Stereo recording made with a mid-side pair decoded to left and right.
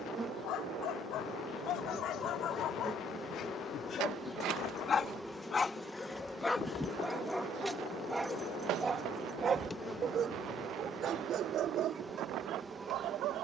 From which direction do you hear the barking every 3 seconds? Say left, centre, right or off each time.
left, left, centre, right, right.